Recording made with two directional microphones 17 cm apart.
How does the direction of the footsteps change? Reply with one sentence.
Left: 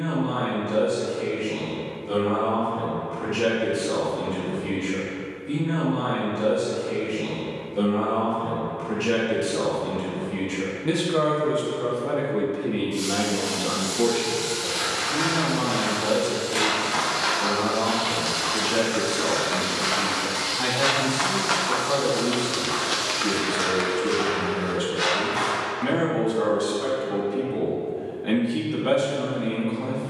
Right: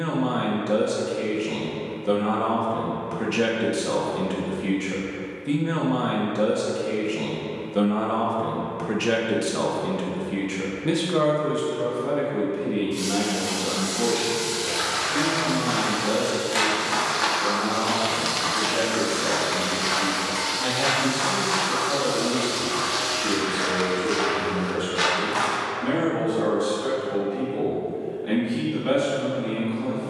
In this clip you hear the footsteps move from right to left and back again.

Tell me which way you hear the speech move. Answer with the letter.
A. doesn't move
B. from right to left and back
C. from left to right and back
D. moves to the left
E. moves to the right
D.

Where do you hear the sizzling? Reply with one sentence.
You can hear the sizzling in the centre.